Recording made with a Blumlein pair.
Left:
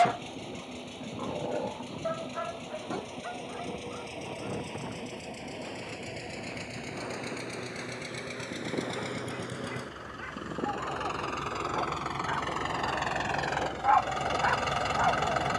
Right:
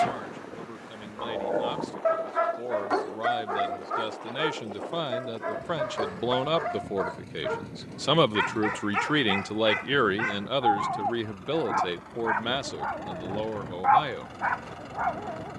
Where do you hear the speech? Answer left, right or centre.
right.